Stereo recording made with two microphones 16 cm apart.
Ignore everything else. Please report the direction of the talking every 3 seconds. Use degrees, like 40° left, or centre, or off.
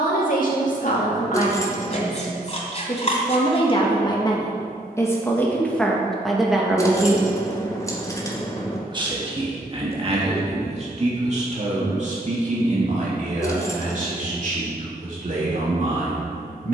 50° left, 20° left, 10° right, 40° right, 50° right, 60° right.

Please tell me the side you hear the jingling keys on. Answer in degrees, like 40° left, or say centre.
20° left.